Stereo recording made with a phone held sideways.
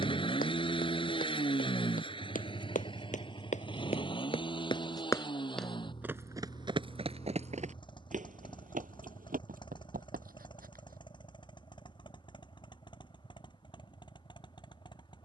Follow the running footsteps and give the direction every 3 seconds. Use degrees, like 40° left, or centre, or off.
70° left, 40° left, 40° right, 70° right, off.